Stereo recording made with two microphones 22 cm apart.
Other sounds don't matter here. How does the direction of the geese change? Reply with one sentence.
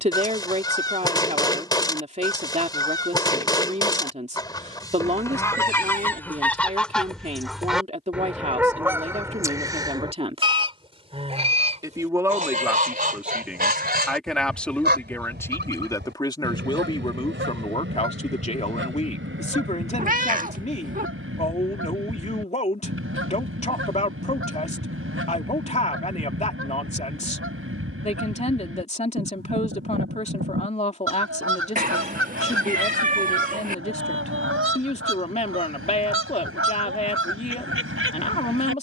In this clip you hear the geese move to the right.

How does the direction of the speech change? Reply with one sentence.
You can hear the speech travel towards the left.